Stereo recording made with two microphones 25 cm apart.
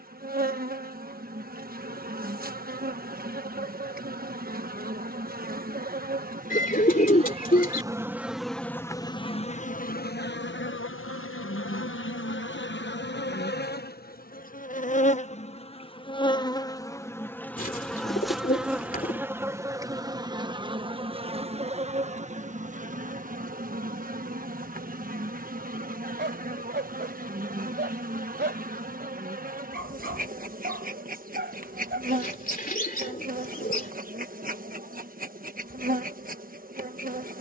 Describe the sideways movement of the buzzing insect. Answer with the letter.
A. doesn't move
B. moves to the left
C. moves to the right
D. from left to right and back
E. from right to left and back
E.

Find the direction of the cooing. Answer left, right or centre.
left.